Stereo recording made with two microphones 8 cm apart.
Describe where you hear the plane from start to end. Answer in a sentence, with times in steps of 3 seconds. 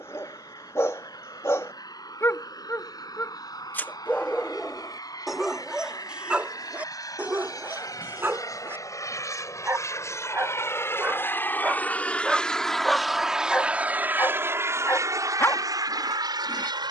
You can hear the plane on the left from 0 s, in the centre from 12 s and on the right from 15 s.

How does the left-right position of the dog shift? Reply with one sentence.
You can hear the dog go right and come back.